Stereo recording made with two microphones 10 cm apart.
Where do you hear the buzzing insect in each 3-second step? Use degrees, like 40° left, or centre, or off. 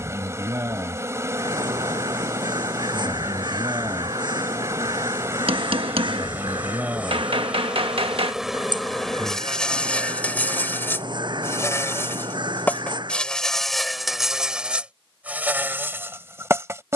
30° right, 30° right, 10° right, 20° left, centre, 20° right.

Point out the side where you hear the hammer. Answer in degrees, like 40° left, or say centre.
70° right.